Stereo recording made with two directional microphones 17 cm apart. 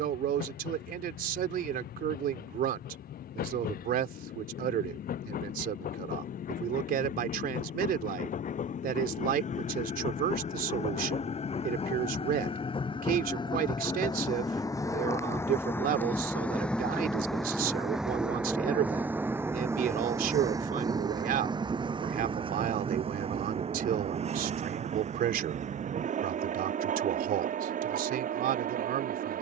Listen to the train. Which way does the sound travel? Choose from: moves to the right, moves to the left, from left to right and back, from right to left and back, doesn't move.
moves to the right.